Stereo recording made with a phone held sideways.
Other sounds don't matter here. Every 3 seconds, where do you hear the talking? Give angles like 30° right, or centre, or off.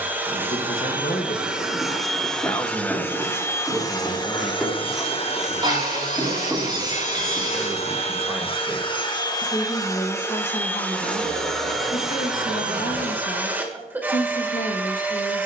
50° left, 10° right, 10° right, 40° left, 60° left.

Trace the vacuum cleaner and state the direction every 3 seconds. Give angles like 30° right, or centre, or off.
centre, 30° left, 40° left, 10° left, 10° right.